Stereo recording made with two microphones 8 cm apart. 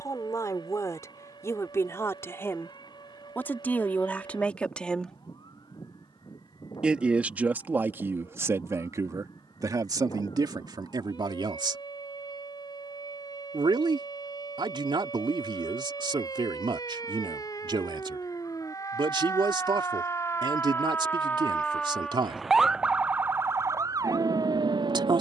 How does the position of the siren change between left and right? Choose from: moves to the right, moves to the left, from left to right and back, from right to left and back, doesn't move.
moves to the right.